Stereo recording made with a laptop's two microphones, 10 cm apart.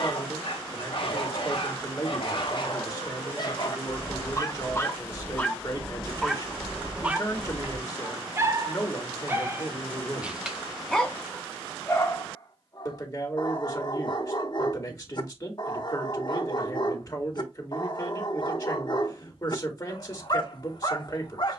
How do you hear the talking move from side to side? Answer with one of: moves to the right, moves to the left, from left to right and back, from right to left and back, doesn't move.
doesn't move.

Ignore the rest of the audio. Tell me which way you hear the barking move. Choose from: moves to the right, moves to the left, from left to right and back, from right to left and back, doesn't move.
from left to right and back.